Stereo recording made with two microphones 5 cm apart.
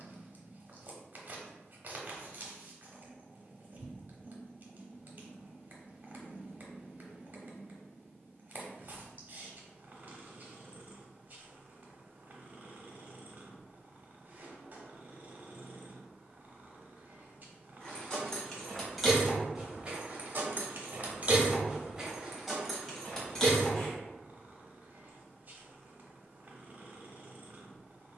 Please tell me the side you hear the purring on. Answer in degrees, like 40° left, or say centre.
40° right.